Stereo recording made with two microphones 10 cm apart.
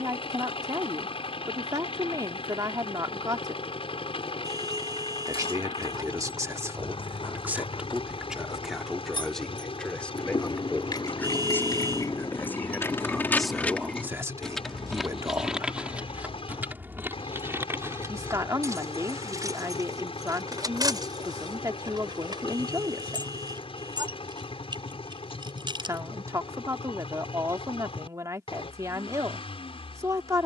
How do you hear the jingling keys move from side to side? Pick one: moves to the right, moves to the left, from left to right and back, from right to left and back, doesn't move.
moves to the right.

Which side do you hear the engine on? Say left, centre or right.
left.